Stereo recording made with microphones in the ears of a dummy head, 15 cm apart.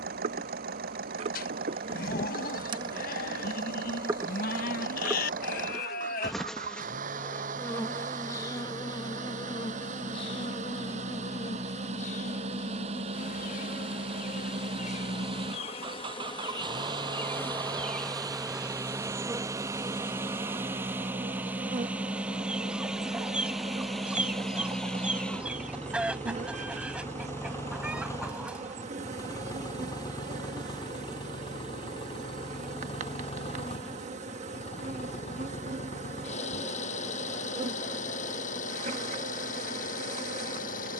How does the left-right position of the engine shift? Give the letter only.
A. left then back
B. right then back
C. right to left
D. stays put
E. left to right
C.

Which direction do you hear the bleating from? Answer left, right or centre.
left.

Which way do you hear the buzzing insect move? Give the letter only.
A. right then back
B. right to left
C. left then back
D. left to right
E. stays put
C.